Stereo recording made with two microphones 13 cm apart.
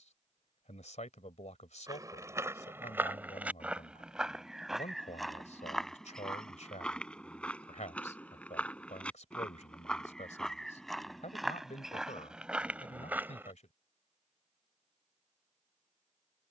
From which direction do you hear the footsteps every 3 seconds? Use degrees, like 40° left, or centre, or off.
20° right, centre, 10° left, centre, 10° right, off.